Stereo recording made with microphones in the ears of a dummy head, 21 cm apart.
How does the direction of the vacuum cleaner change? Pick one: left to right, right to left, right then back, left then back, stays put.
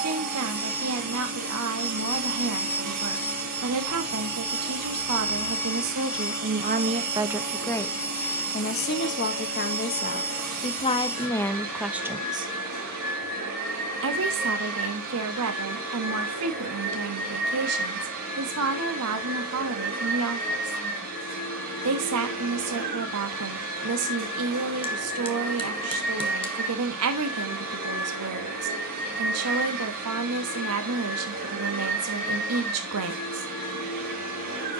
stays put.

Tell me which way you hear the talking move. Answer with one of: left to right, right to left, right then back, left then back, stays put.
left then back.